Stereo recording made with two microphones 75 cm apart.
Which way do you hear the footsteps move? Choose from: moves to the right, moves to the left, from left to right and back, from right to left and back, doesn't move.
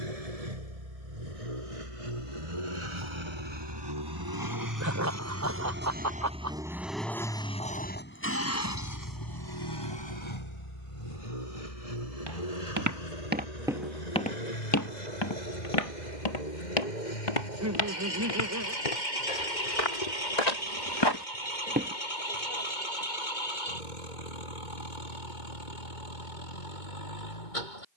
from right to left and back.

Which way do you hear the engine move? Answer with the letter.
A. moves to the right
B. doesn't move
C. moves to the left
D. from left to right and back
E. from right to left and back
C.